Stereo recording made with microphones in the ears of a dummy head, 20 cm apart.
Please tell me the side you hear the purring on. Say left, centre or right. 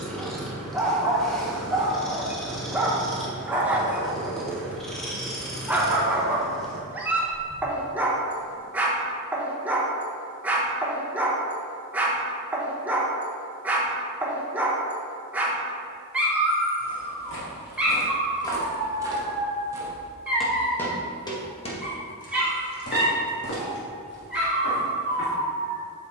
centre.